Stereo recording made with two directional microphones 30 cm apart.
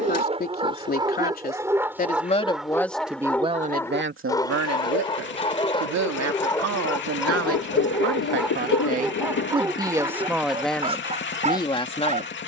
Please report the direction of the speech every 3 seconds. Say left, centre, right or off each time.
left, right, right, centre.